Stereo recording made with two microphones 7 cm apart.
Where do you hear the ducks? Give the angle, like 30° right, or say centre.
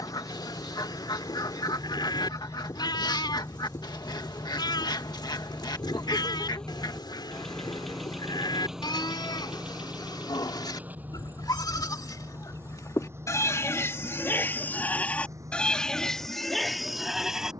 70° left.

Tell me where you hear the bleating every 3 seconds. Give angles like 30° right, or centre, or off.
80° left, 80° left, 80° left, 70° left, 40° left, 10° left.